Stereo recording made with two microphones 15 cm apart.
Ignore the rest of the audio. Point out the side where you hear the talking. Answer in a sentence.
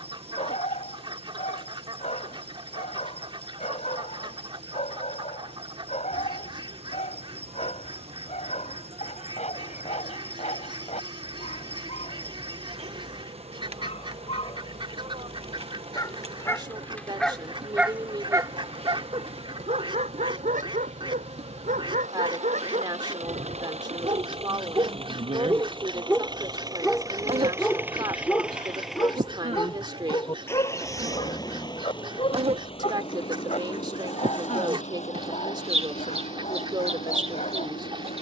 You can hear the talking on the right.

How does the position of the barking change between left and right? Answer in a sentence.
You can hear the barking go right and come back.